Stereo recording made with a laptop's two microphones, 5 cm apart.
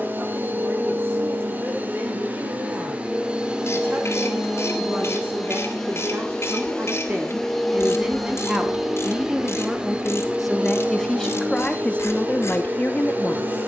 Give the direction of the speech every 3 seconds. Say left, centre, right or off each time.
right, right, right, centre, left.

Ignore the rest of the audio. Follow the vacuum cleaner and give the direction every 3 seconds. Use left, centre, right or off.
right, centre, centre, right, right.